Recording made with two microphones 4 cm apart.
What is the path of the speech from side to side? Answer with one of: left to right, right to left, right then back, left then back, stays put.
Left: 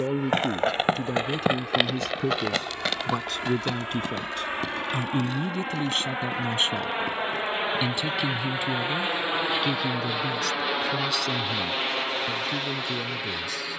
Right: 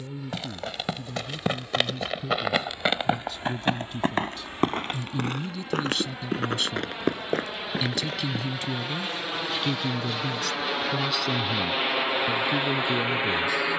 left to right.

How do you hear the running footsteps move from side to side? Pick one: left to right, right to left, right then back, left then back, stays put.
left to right.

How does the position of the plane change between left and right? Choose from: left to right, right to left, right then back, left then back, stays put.
left to right.